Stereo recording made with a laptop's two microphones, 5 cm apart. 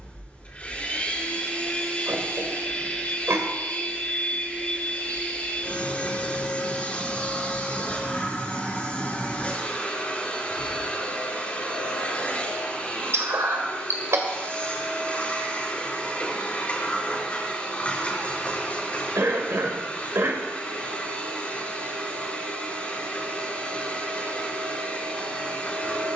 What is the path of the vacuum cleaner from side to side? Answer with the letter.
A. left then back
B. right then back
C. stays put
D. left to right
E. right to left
C.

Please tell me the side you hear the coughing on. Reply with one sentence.
In this clip you hear the coughing on the right.